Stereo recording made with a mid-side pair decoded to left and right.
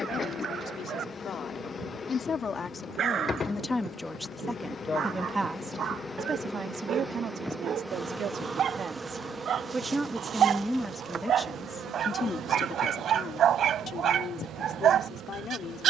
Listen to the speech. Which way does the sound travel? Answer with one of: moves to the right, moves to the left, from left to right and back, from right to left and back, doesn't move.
from left to right and back.